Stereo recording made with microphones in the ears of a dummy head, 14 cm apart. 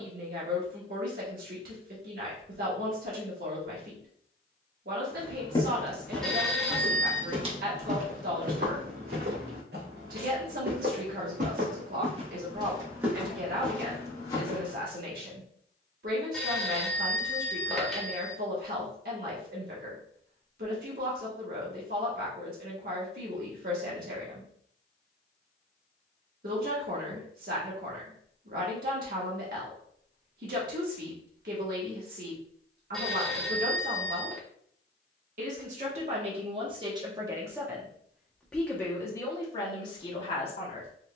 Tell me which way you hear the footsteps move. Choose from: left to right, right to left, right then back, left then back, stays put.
right then back.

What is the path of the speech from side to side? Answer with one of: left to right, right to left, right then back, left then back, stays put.
right to left.